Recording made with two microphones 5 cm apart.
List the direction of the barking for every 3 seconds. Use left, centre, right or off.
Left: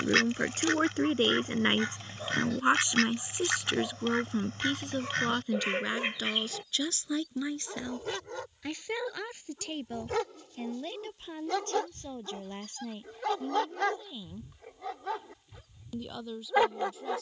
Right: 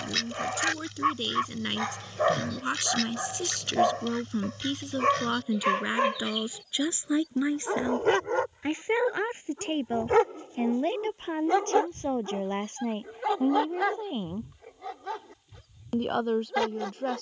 right, right, right, right, centre, centre.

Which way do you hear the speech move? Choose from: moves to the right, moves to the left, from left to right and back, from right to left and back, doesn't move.
moves to the right.